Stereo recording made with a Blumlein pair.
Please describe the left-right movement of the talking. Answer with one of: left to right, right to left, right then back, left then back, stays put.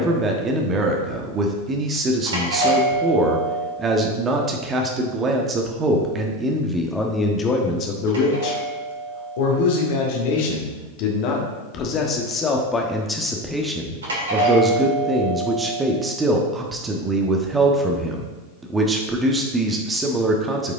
left then back.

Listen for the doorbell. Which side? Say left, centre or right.
right.